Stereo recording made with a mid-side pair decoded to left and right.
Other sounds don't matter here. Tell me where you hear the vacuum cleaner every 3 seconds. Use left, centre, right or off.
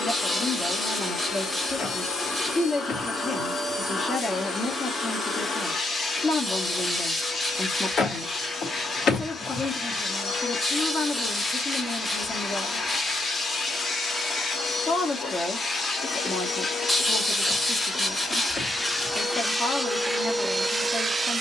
left, left, left, left, left, left, centre.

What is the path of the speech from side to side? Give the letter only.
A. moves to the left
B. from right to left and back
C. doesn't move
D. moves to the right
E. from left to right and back
C.